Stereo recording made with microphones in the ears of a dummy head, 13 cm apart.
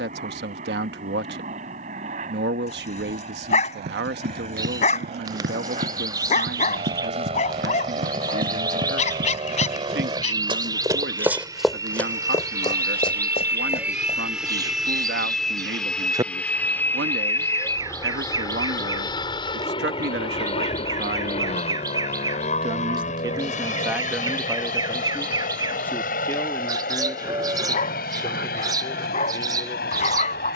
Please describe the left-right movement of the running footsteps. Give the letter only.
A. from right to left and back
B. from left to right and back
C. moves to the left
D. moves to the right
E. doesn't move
C.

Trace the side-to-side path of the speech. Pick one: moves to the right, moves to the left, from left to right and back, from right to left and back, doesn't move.
moves to the left.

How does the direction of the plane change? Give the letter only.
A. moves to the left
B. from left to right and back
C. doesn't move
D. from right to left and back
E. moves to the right
A.